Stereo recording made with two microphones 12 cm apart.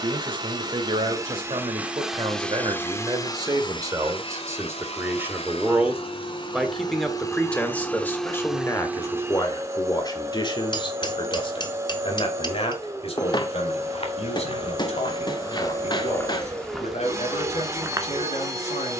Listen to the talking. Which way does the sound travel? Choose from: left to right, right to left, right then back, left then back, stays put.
right to left.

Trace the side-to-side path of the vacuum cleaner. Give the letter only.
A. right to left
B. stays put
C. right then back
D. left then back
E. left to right
D.